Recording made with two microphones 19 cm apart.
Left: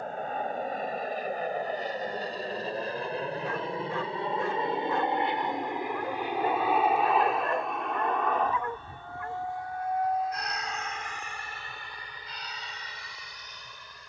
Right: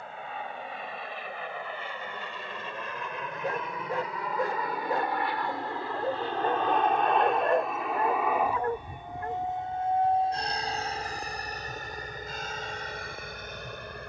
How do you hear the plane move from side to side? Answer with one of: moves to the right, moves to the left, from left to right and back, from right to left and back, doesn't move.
moves to the right.